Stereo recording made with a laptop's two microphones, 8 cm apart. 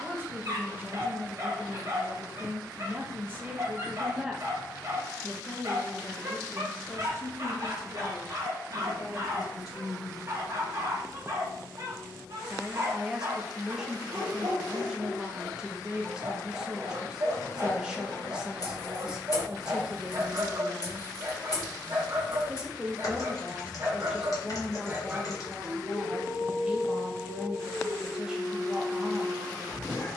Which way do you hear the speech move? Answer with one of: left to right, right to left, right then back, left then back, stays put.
left then back.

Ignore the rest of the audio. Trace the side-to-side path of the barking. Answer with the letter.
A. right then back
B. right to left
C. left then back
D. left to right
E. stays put
B.